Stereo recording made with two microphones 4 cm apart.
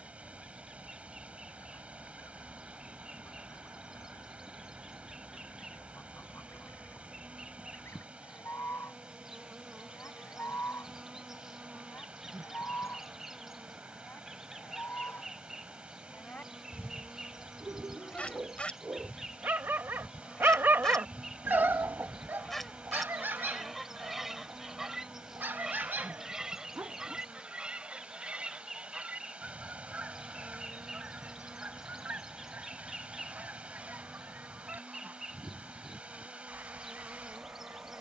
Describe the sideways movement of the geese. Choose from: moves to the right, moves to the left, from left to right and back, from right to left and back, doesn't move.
moves to the right.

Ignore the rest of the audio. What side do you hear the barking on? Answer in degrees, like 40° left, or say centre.
50° right.